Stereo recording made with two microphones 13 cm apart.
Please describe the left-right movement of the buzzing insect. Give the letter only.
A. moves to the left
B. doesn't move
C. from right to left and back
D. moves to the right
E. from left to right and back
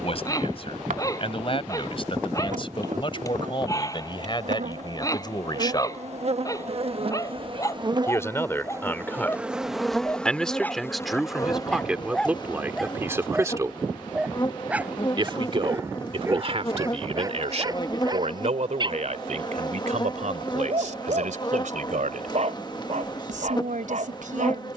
A.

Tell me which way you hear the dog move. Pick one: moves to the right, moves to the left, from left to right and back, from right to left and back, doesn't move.
moves to the right.